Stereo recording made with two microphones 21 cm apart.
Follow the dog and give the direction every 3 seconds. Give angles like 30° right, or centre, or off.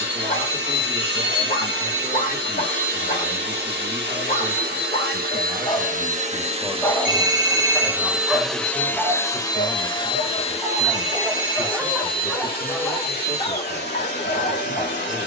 40° left, 30° left, centre, 10° right, 20° left.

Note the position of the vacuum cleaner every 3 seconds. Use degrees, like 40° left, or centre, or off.
50° right, 50° right, 10° right, 30° left, 50° left.